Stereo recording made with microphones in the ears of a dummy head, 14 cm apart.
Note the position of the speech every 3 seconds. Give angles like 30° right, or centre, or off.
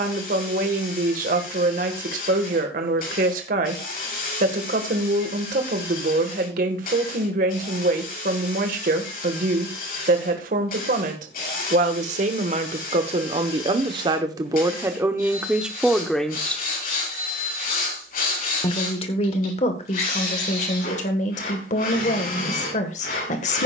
60° right, 60° right, 60° right, 60° right, 30° right, centre, 40° left, 50° left.